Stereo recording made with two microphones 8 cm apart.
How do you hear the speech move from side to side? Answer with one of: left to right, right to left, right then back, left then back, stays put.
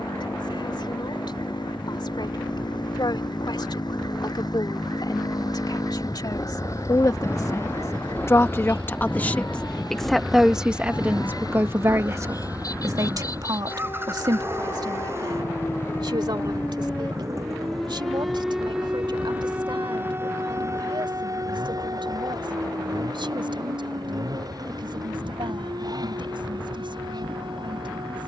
left to right.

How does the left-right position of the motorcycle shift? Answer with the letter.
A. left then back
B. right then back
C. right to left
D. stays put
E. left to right
E.